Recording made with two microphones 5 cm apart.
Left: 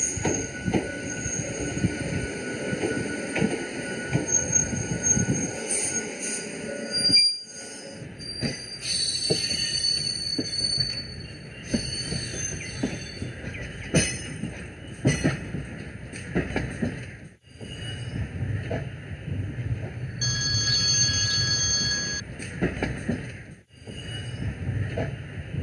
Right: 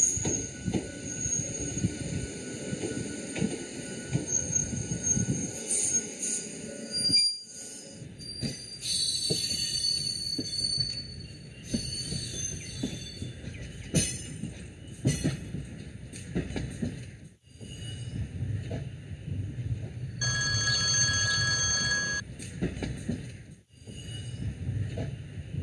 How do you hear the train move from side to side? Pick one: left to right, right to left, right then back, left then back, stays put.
stays put.